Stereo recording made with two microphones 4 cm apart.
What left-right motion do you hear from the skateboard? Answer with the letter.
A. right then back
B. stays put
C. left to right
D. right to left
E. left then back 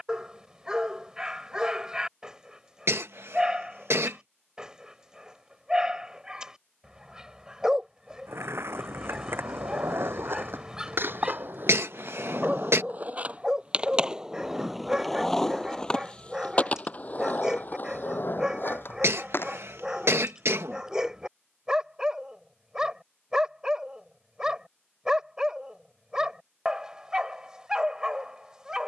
D.